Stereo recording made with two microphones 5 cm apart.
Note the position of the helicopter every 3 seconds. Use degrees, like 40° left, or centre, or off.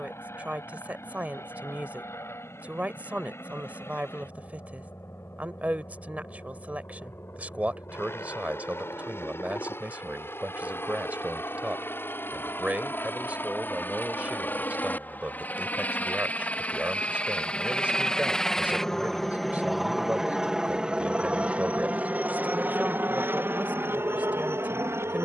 60° left, 60° left, 60° left, 50° left, 40° left, 30° left, centre, 40° right, 50° right.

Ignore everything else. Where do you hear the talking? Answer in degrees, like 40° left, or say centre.
30° right.